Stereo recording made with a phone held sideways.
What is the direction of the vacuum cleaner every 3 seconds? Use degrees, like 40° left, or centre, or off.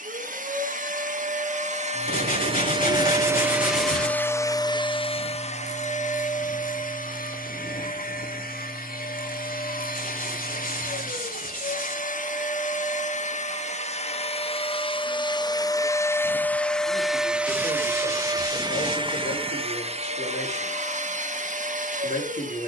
50° right, 20° left, 60° left, 60° left, 50° left, 10° left, 40° right, 60° right.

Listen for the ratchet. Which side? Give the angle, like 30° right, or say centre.
30° right.